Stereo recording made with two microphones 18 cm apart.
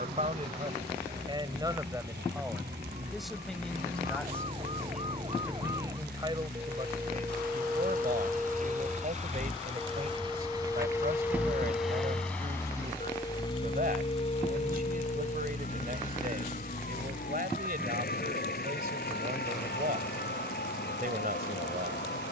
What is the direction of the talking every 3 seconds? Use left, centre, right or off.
right, centre, right, right, right, right, right, right.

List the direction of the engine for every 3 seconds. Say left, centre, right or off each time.
right, right, right, right, left, left, left, left.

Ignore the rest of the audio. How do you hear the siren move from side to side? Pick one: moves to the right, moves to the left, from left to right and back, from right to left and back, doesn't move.
moves to the left.